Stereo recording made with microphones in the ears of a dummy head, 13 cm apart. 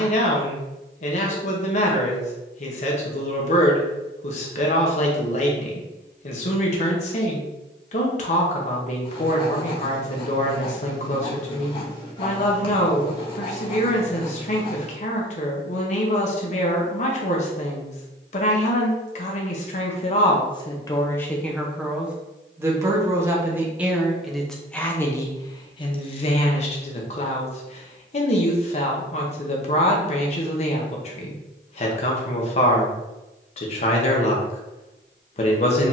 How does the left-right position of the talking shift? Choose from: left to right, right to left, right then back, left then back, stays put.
right then back.